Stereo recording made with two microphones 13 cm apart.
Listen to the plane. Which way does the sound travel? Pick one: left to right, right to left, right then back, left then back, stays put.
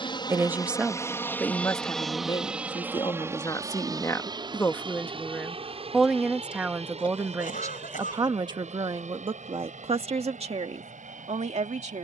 left to right.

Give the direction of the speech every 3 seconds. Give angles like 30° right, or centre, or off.
20° left, 20° left, 20° right, 50° right.